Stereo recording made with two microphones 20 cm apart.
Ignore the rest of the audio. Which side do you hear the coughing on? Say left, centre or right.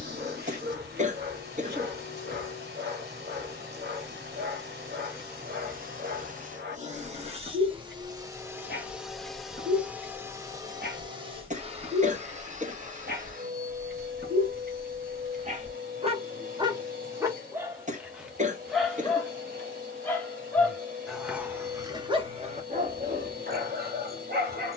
right.